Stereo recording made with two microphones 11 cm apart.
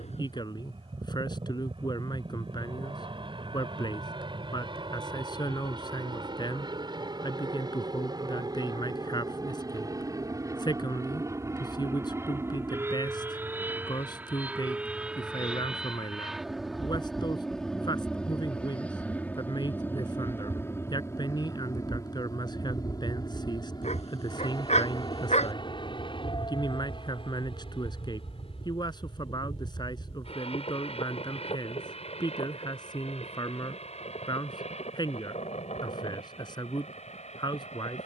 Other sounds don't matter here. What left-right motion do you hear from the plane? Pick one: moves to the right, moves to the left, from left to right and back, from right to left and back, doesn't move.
moves to the left.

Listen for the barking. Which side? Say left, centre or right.
left.